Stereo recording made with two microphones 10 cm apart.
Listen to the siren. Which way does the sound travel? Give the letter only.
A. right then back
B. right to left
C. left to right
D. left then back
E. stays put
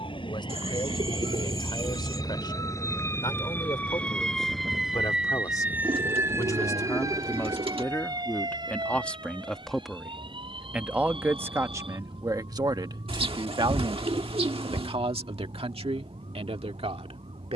C.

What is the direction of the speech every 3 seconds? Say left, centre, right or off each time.
left, left, left, centre, right, right.